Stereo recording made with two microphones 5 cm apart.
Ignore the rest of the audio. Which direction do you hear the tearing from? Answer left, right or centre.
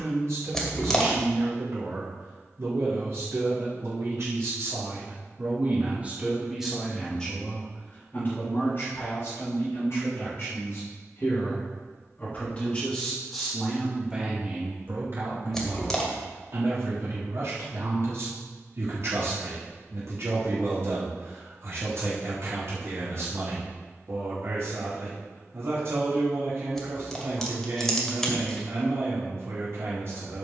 centre.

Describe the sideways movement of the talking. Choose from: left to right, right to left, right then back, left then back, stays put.
left then back.